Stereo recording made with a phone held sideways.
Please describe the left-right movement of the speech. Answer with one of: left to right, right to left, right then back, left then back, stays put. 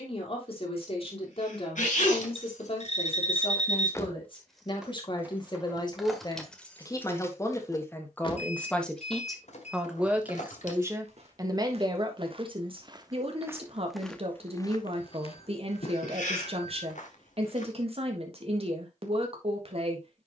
left to right.